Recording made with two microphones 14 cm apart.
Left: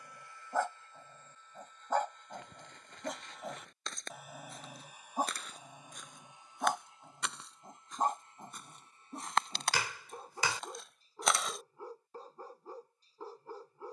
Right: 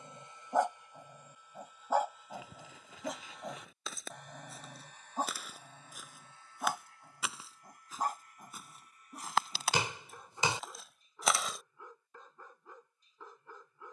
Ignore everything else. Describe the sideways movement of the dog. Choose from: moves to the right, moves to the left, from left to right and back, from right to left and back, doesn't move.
moves to the left.